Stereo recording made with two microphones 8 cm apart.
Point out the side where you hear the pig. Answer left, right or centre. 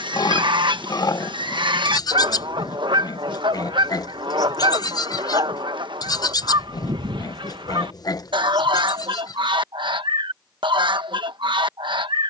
left.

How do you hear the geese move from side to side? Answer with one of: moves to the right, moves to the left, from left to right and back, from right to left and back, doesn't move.
doesn't move.